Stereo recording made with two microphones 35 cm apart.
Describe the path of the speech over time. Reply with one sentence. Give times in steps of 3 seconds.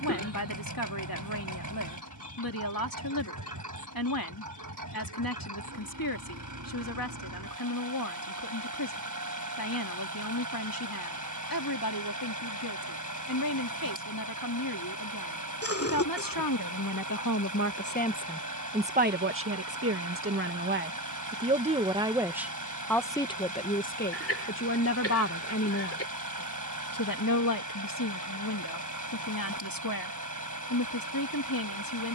In this clip you hear the speech on the left from 0 s, on the right from 18 s, in the centre from 21 s and on the left from 24 s.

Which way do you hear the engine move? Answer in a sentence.
You can hear the engine stay in one place.